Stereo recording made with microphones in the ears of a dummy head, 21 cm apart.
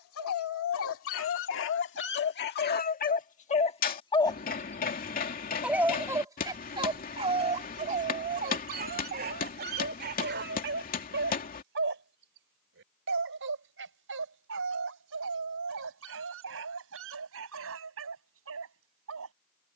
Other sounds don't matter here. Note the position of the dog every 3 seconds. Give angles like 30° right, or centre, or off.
50° left, 10° left, 30° right, 40° right, 60° right, 60° right, 60° right.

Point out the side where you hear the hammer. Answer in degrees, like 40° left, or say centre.
40° left.